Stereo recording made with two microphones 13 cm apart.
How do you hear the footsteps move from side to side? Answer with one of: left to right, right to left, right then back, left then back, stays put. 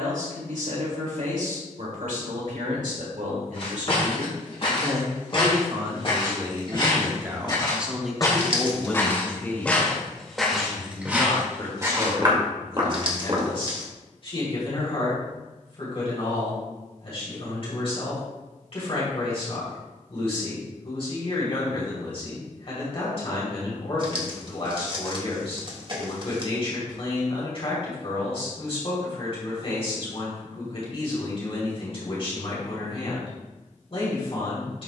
left to right.